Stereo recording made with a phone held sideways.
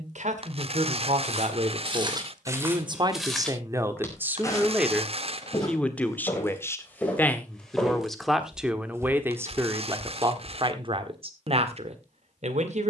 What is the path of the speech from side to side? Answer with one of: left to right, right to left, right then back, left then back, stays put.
left then back.